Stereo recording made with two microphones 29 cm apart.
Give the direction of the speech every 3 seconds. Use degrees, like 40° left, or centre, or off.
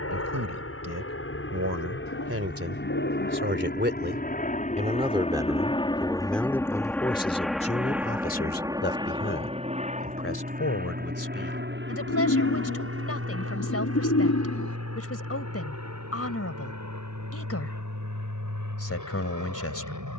60° right, 20° right, 20° left, 50° left, 50° left, 50° left, 50° left.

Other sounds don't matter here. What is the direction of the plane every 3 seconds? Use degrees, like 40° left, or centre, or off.
50° left, 30° left, centre, 30° right, 40° right, 60° right, 60° right.